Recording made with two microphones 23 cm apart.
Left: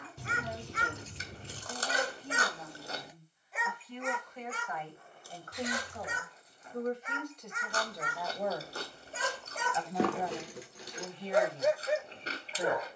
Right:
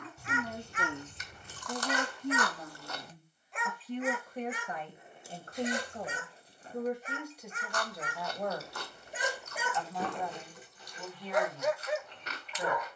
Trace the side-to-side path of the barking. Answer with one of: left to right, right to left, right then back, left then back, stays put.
right then back.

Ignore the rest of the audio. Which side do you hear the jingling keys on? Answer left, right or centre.
left.